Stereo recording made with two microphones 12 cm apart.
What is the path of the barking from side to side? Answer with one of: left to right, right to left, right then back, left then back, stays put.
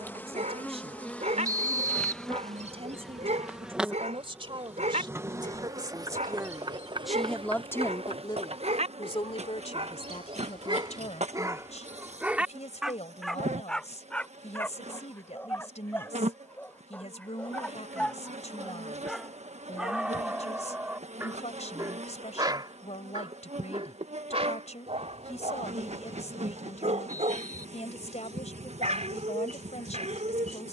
left then back.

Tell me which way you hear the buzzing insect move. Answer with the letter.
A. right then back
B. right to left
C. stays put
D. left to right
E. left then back
D.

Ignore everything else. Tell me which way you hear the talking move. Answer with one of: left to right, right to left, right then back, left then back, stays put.
right to left.